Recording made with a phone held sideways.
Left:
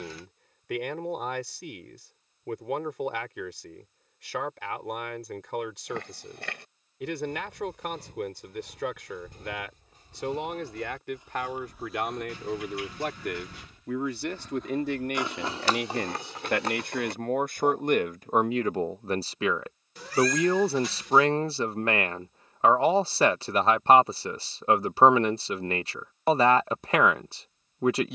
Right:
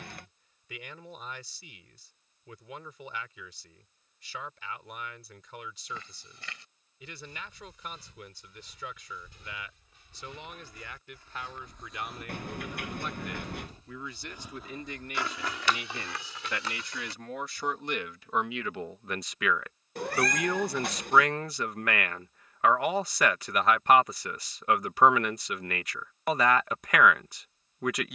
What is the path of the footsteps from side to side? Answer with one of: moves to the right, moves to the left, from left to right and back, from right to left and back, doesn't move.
from left to right and back.